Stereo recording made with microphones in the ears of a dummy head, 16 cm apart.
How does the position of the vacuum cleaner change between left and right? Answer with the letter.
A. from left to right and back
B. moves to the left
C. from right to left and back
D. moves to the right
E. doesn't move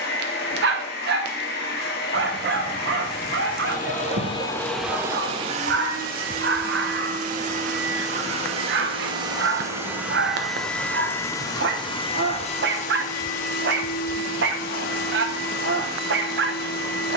A.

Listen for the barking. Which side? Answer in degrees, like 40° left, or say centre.
60° right.